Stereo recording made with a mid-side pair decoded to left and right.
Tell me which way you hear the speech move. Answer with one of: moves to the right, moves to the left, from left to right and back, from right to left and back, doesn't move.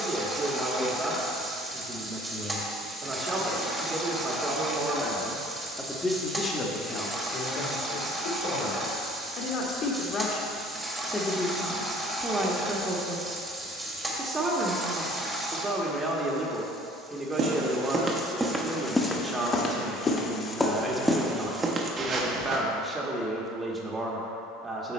from right to left and back.